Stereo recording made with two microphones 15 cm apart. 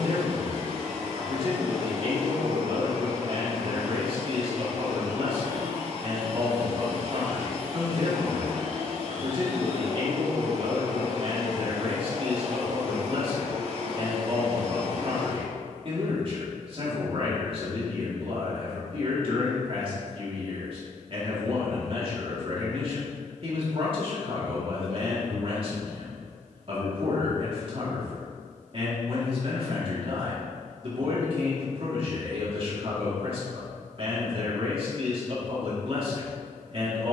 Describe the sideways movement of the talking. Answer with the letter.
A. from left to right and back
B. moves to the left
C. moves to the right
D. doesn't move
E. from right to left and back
D.